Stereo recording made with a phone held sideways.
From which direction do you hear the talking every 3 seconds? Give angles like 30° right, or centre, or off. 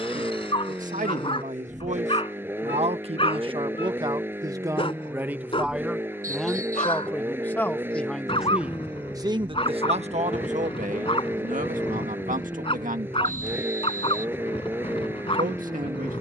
60° right, 20° right, centre, 60° right, 70° right, 70° right.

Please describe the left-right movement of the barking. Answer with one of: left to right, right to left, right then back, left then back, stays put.
stays put.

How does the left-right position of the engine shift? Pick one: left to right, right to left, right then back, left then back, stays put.
stays put.